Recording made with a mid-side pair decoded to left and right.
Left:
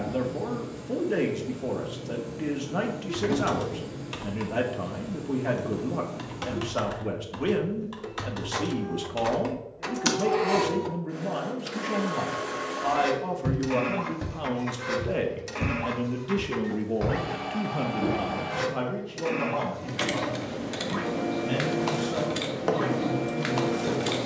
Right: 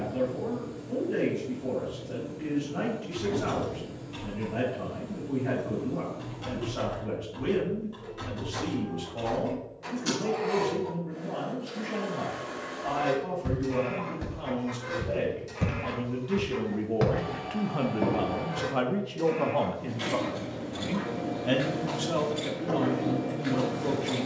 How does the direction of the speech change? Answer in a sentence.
You can hear the speech travel towards the right.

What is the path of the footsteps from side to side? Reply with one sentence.
You can hear the footsteps move from left to right.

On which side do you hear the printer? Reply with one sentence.
You can hear the printer on the left.